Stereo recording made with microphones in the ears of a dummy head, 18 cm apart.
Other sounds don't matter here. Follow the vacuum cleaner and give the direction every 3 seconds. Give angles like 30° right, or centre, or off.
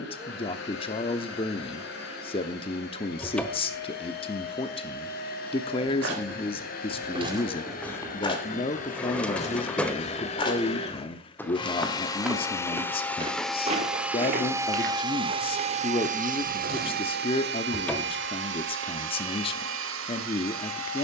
60° left, 50° left, 50° left, 30° left, centre, 40° right, 70° right.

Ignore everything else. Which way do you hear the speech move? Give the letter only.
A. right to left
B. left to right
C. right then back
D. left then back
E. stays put
E.